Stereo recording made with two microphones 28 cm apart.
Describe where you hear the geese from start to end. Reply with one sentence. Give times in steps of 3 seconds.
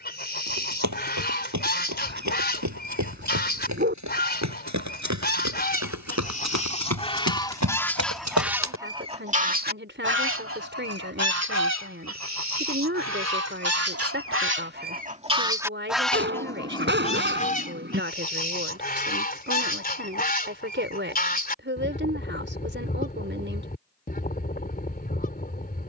You can hear the geese on the left from 0 s, in the centre from 6 s, on the right from 9 s, in the centre from 15 s and on the left from 18 s.